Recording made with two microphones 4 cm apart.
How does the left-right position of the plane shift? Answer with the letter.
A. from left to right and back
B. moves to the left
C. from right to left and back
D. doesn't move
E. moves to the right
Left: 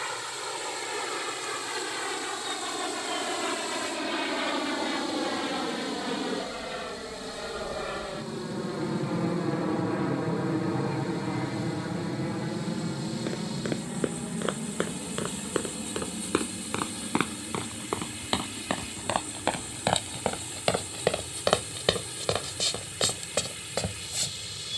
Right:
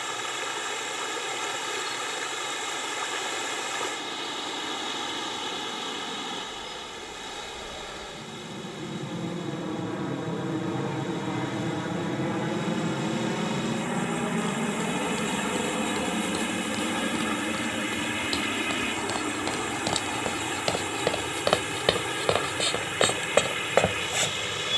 E.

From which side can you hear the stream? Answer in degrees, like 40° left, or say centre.
60° right.